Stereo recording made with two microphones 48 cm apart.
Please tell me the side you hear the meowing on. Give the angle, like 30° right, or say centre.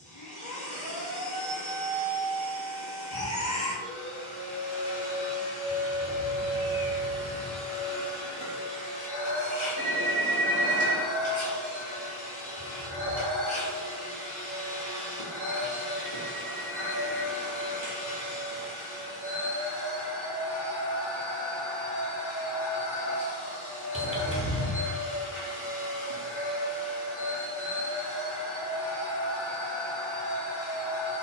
10° left.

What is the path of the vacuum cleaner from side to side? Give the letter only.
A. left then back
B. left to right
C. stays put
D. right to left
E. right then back
C.